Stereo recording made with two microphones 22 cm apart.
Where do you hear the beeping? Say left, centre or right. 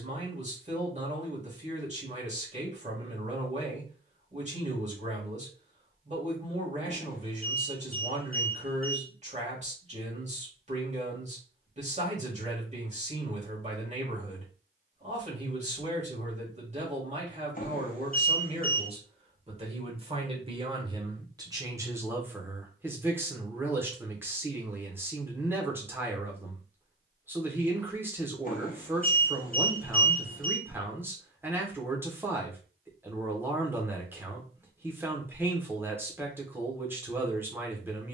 left.